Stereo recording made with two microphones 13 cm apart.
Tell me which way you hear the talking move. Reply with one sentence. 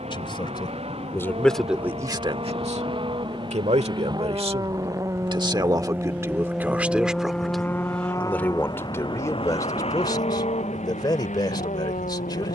You can hear the talking move from left to right and back again.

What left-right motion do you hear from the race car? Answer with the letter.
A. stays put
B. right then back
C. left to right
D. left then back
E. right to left
E.